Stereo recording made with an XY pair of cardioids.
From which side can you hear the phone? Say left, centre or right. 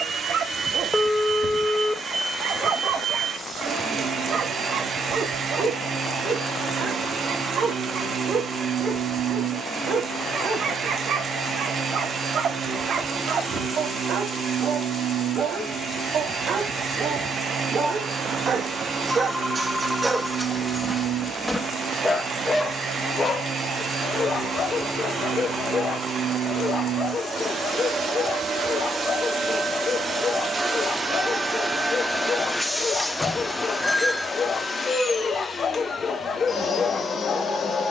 centre.